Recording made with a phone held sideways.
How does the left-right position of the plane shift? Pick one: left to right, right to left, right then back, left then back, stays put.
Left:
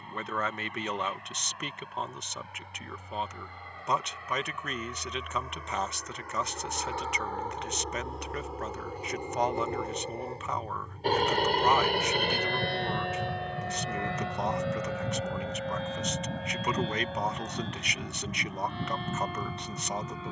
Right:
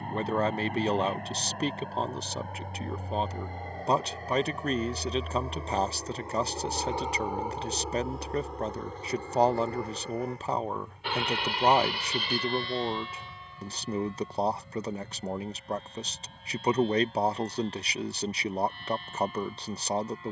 right to left.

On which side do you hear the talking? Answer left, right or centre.
right.